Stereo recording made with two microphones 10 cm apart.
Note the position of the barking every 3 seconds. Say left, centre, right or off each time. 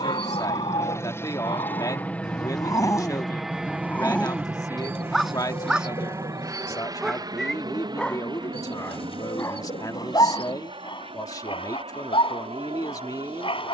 left, centre, centre, left, left.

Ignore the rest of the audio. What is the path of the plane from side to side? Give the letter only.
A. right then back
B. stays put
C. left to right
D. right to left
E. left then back
C.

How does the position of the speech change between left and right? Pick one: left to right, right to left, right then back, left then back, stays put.
stays put.